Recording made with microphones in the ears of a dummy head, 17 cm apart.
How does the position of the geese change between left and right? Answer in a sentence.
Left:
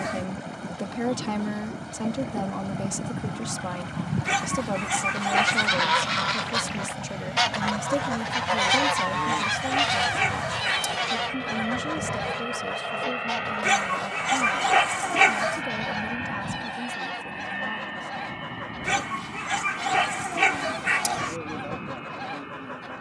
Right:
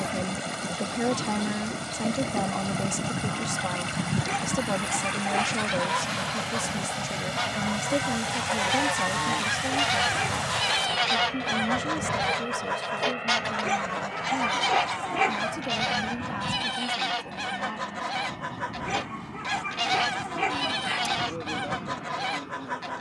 You can hear the geese go left and come back.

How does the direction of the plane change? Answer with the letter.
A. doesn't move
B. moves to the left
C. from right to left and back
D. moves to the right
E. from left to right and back
B.